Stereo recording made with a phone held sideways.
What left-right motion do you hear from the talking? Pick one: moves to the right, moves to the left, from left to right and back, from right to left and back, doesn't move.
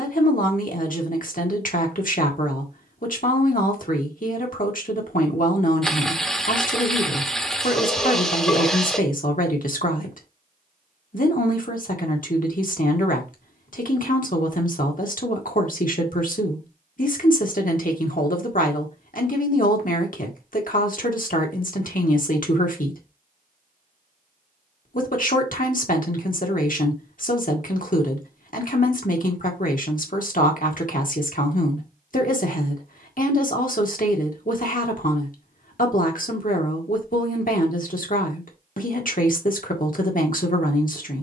doesn't move.